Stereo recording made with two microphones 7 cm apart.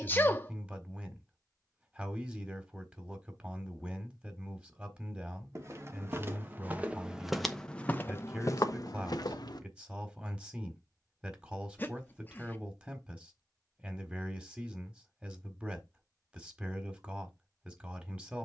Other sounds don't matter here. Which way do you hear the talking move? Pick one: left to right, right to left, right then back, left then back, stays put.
stays put.